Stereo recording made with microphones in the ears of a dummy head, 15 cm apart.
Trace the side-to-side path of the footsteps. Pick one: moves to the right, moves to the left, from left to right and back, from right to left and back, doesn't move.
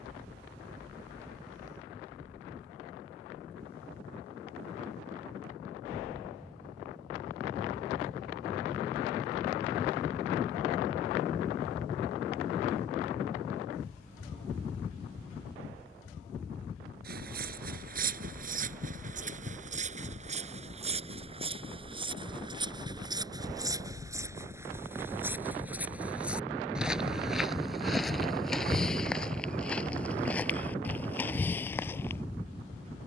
moves to the left.